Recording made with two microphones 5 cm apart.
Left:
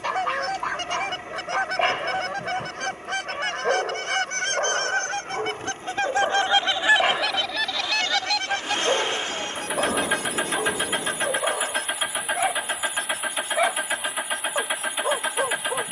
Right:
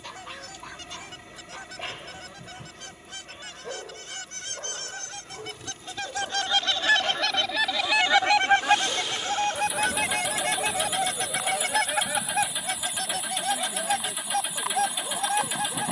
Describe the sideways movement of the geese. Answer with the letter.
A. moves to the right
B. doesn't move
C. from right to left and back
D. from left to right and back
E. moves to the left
A.